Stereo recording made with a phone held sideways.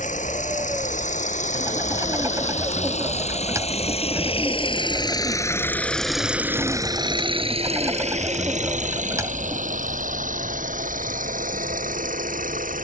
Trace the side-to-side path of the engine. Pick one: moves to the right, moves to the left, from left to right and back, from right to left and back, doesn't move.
moves to the right.